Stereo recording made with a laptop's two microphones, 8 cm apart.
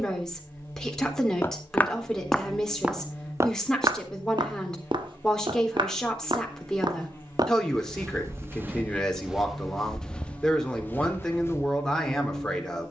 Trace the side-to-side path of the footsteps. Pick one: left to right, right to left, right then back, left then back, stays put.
right then back.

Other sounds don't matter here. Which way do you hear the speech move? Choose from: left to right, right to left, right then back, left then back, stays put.
stays put.